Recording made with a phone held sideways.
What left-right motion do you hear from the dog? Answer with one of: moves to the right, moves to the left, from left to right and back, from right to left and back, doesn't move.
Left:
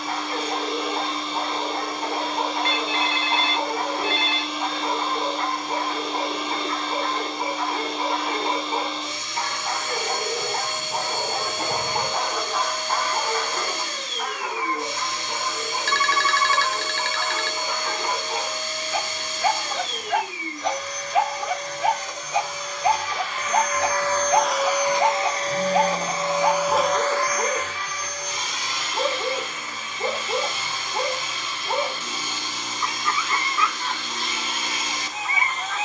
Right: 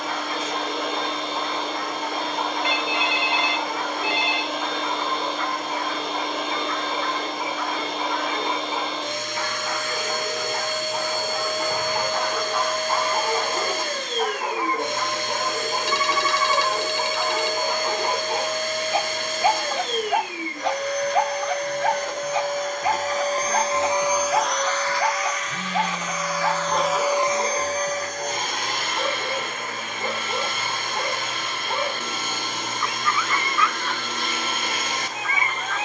from left to right and back.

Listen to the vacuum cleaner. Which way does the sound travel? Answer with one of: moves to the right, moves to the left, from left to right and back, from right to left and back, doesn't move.
from right to left and back.